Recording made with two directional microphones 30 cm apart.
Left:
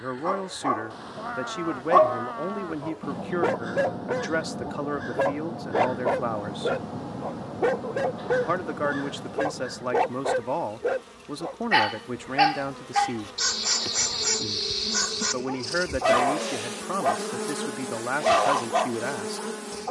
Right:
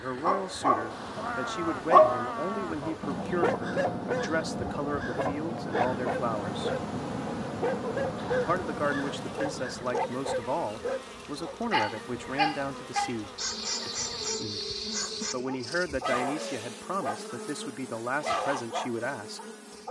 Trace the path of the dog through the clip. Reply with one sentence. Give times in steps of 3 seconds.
You can hear the dog in the centre from 0 s and on the left from 3 s.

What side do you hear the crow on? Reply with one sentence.
In this clip you hear the crow in the centre.